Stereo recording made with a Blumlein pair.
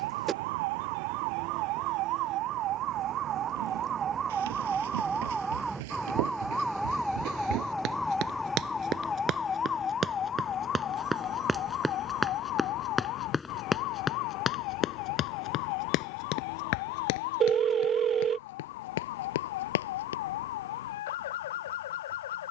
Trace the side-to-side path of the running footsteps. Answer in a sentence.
You can hear the running footsteps move to the left.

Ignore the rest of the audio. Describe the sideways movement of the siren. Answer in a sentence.
In this clip you hear the siren move to the left.